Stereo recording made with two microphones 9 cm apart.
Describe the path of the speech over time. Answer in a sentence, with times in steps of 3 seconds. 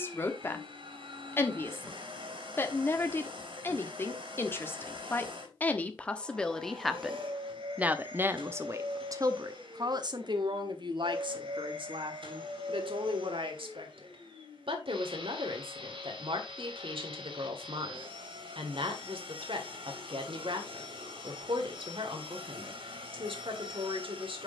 In this clip you hear the speech on the left from 0 s, in the centre from 6 s and on the right from 9 s.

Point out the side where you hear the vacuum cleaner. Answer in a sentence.
In this clip you hear the vacuum cleaner on the right.